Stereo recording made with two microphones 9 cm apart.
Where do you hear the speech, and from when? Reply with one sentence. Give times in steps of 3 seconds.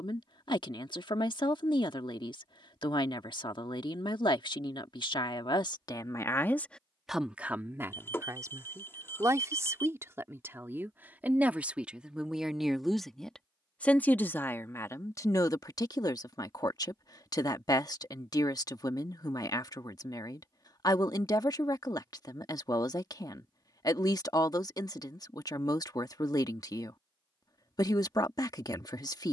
In this clip you hear the speech on the left from 0 s, in the centre from 6 s, on the right from 9 s, in the centre from 12 s and on the left from 15 s.